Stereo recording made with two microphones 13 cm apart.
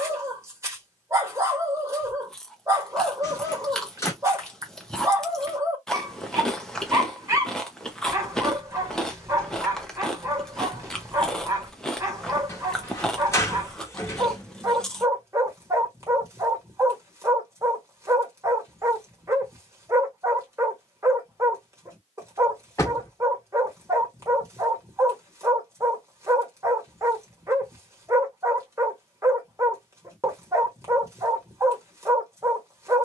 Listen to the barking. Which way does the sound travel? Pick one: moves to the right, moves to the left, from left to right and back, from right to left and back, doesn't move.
doesn't move.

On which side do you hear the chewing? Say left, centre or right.
centre.